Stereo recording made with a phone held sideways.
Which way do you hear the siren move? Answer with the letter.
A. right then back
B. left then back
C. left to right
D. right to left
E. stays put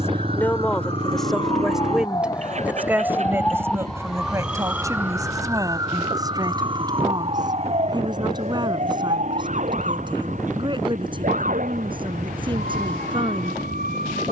C.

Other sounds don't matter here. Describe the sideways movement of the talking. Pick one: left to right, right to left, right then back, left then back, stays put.
left to right.